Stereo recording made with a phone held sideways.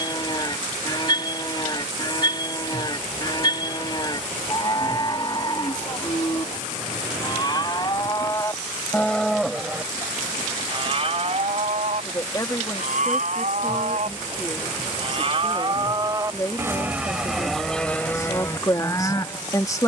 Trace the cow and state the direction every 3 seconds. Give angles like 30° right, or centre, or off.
30° left, 30° left, 30° left, 30° right, 60° right, 20° right, 20° left.